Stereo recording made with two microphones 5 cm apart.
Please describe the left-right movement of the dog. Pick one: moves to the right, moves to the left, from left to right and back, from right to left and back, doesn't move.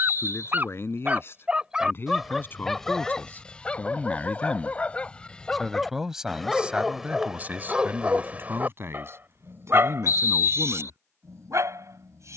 from right to left and back.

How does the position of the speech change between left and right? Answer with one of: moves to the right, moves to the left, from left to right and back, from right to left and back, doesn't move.
moves to the right.